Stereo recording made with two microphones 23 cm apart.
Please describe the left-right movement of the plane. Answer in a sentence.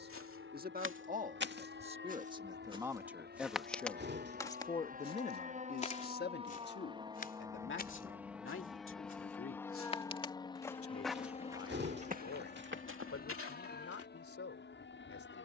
In this clip you hear the plane travel towards the left.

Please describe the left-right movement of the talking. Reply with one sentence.
In this clip you hear the talking move from right to left.